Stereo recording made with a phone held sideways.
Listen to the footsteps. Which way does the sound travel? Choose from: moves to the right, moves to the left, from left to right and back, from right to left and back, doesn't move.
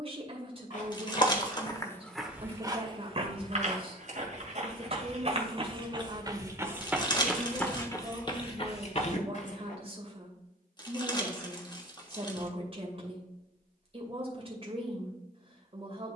from left to right and back.